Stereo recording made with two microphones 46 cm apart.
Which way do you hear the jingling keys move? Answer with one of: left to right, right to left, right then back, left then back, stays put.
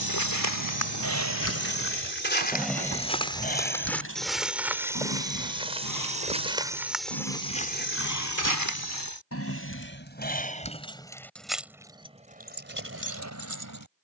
left then back.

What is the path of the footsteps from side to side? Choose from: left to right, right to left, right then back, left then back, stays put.
right then back.